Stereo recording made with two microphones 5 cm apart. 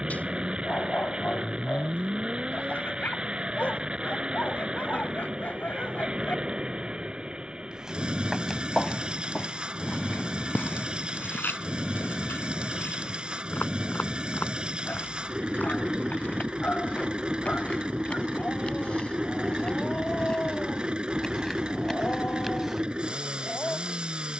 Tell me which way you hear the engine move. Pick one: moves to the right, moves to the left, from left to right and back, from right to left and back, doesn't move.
doesn't move.